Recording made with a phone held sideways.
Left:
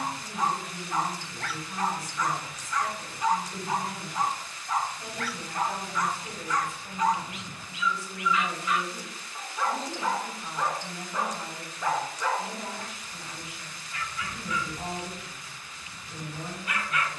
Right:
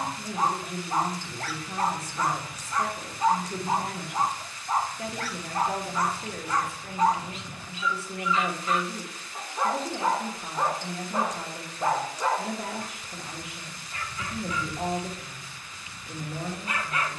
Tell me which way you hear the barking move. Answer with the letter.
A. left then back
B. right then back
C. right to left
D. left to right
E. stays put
E.